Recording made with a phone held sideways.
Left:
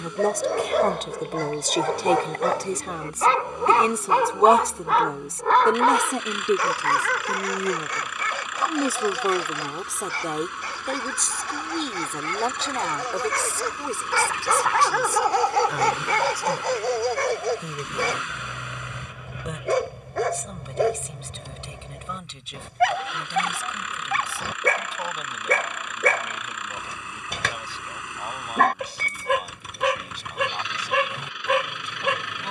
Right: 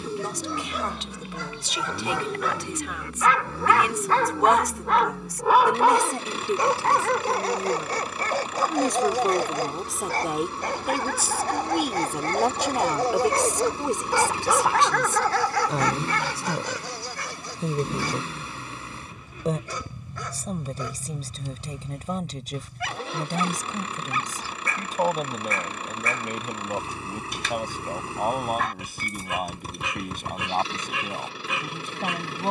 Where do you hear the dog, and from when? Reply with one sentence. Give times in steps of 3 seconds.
In this clip you hear the dog on the left from 0 s, in the centre from 3 s, on the right from 6 s and on the left from 15 s.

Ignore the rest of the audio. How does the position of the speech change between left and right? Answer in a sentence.
In this clip you hear the speech travel towards the right.